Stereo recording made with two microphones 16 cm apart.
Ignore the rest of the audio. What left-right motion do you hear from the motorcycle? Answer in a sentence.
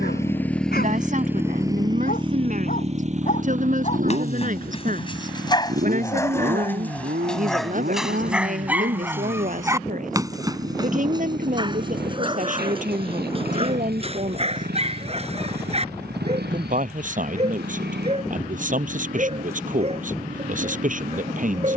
You can hear the motorcycle move from left to right.